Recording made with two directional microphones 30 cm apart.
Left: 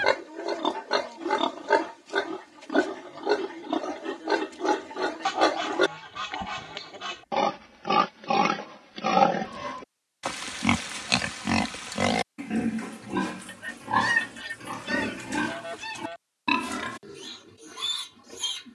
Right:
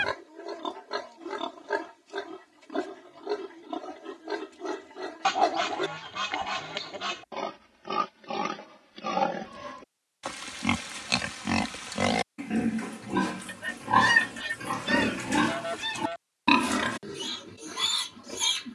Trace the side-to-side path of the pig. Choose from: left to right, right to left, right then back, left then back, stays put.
left to right.